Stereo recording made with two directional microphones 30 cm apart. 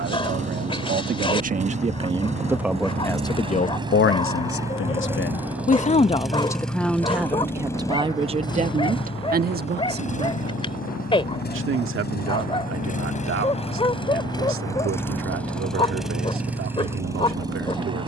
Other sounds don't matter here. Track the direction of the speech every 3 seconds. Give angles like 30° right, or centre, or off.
20° right, 30° left, 10° right, 40° right, 50° right, 50° right.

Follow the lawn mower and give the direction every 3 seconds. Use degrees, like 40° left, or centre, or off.
20° right, 10° right, 10° left, 30° left, 20° left, centre.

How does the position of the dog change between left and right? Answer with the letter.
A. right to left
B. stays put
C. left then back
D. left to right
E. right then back
B.